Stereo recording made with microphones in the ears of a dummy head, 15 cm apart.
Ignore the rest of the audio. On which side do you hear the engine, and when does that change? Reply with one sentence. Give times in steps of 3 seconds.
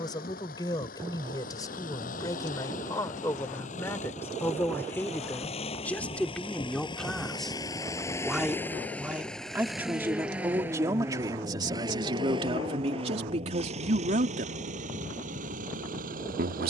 You can hear the engine on the left from 0 s, in the centre from 9 s and on the right from 12 s.